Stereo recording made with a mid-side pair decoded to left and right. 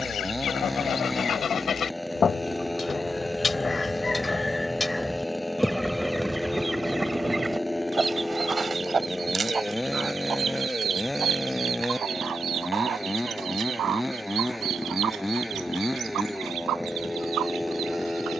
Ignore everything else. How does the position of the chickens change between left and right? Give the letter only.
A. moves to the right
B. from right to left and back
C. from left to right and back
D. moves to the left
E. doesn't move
A.